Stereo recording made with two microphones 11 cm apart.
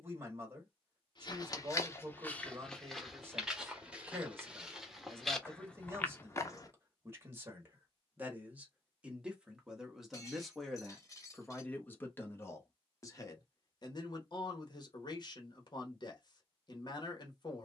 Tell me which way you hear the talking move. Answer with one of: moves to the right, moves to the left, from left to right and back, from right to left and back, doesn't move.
moves to the left.